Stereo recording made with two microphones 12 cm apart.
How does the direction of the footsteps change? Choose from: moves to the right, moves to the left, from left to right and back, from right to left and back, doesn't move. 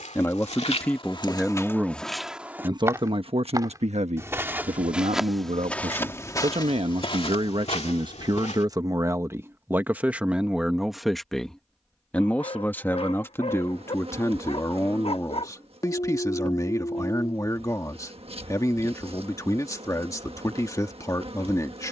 from left to right and back.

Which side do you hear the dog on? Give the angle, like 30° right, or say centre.
50° left.